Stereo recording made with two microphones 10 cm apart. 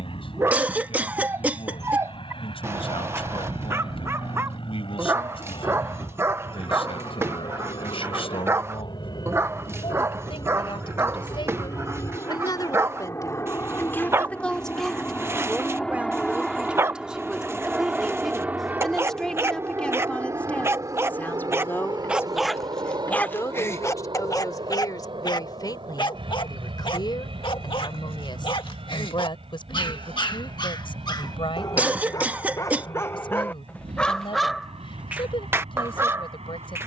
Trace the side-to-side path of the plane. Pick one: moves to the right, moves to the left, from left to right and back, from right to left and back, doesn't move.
moves to the right.